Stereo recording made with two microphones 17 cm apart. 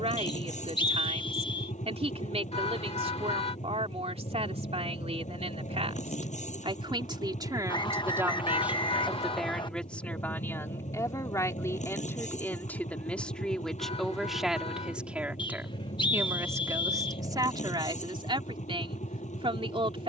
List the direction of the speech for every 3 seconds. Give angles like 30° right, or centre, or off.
40° right, 40° right, 20° right, 10° left, centre, 20° right, 30° right.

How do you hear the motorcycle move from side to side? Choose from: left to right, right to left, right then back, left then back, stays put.
stays put.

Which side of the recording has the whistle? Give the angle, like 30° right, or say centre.
30° left.